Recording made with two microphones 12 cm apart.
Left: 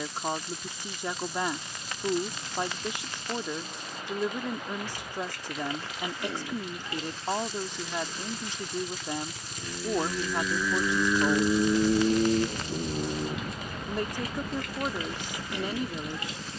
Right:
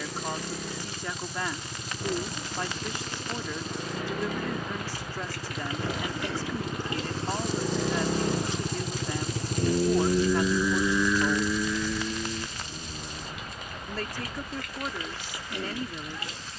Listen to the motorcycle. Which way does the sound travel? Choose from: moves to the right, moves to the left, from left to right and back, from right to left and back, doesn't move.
moves to the left.